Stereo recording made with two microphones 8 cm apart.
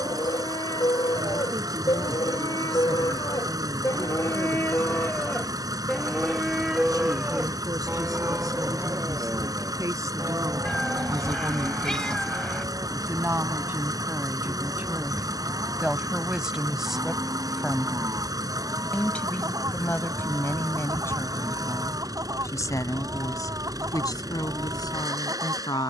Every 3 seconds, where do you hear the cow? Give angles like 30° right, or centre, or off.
70° left, 40° left, 20° right, 40° right, 50° right, 50° right, 50° right, 50° right, 50° right.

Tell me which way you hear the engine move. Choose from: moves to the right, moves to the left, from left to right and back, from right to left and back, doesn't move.
doesn't move.